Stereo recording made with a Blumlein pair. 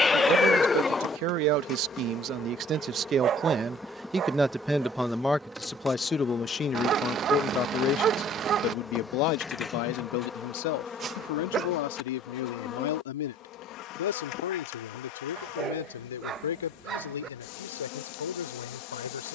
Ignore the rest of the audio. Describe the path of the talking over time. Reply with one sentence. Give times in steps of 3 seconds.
In this clip you hear the talking on the right from 0 s, in the centre from 3 s and on the left from 6 s.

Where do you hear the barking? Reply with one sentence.
You can hear the barking on the right.